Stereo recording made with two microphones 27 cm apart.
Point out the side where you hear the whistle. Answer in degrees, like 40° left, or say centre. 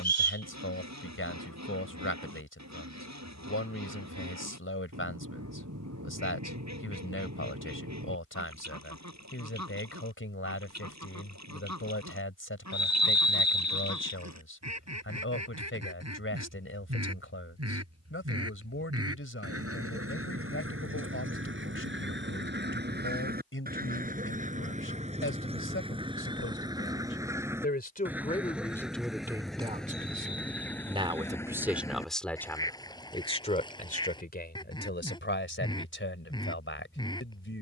80° left.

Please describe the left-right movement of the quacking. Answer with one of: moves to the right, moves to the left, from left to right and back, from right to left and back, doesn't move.
moves to the left.